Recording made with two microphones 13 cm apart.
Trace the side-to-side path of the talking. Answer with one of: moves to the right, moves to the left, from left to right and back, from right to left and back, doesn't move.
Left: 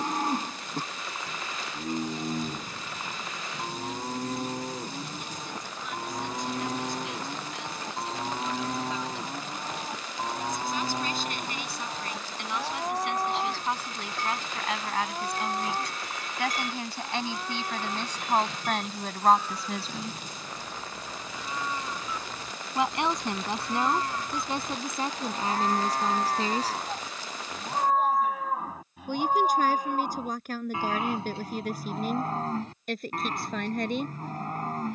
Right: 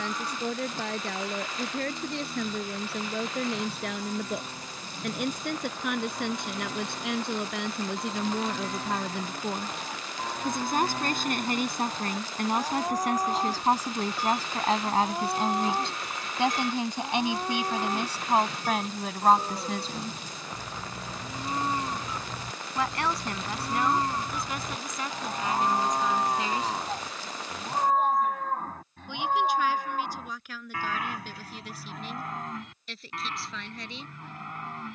moves to the left.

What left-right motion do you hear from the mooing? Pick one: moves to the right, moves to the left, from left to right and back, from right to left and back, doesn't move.
from left to right and back.